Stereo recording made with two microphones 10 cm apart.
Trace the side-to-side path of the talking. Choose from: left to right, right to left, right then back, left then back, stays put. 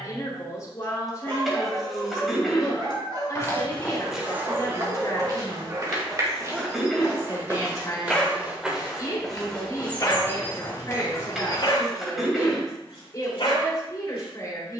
stays put.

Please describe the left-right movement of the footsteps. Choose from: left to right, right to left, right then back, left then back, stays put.
right then back.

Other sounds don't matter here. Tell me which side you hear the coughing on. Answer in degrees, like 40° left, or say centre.
centre.